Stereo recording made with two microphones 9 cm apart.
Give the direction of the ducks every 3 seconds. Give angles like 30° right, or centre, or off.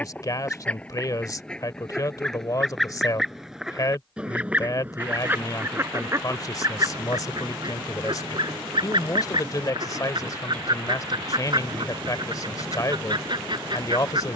10° left, 10° right, 50° right, 50° right, 50° right.